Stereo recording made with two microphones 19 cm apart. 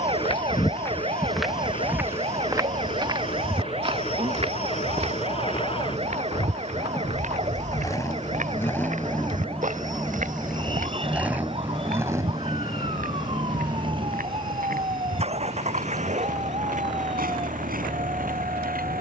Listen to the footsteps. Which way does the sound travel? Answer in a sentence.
You can hear the footsteps move to the right.